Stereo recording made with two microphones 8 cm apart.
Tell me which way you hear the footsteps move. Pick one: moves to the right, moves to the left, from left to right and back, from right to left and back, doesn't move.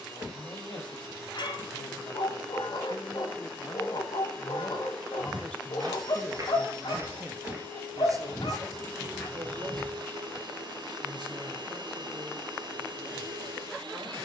moves to the left.